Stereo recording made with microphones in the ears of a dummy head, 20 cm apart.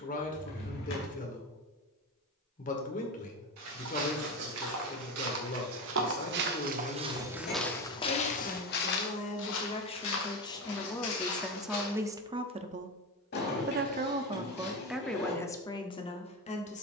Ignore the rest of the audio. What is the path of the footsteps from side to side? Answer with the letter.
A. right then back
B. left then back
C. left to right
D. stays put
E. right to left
E.